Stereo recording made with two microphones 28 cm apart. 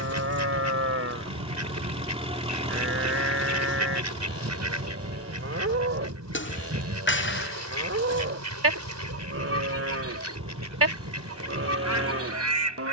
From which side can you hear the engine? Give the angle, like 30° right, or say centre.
20° right.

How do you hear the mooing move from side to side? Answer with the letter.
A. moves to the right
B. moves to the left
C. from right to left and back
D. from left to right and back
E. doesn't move
E.